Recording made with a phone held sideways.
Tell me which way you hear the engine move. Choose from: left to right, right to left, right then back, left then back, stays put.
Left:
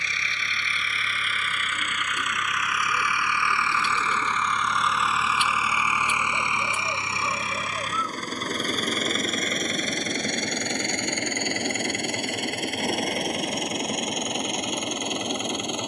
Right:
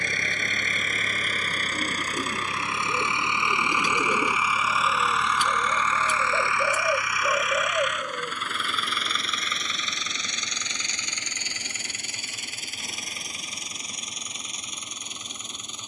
right to left.